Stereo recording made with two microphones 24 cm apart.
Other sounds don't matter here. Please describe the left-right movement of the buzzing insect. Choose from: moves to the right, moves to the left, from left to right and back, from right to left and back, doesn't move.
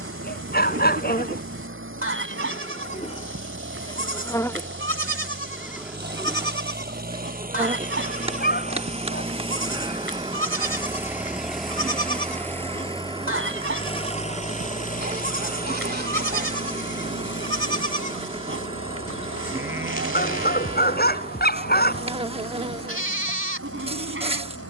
moves to the right.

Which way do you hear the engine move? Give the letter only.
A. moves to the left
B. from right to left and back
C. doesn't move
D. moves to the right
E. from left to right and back
A.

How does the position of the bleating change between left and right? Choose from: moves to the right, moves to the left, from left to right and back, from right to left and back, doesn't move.
doesn't move.